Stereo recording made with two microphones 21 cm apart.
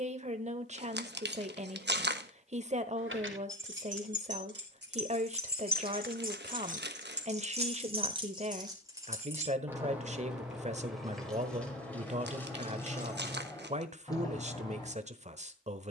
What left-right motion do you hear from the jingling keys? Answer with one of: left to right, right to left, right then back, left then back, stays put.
right to left.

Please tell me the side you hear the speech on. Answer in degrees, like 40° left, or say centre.
30° right.